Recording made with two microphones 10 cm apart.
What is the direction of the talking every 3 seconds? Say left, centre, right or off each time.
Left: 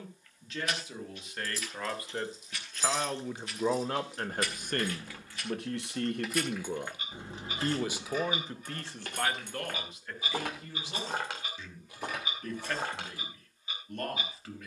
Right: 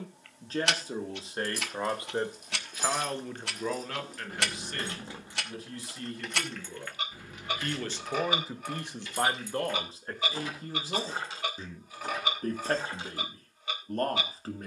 right, left, left, right, right.